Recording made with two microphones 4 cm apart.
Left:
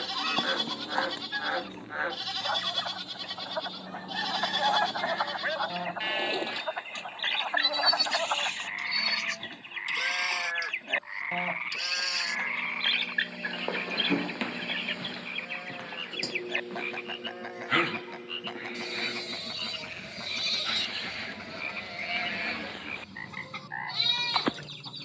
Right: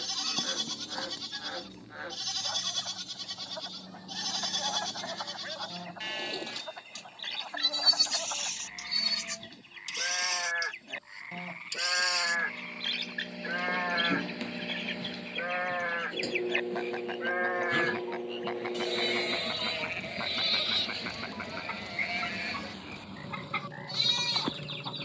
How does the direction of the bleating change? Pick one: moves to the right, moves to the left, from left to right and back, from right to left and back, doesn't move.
from left to right and back.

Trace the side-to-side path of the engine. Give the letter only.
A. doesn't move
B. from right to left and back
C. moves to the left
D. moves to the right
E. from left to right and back
D.